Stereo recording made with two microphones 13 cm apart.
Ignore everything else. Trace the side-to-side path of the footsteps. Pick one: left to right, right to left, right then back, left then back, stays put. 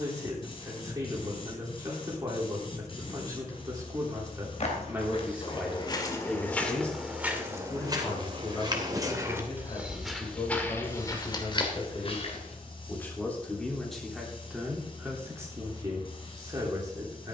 right then back.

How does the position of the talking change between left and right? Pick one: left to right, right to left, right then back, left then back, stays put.
left then back.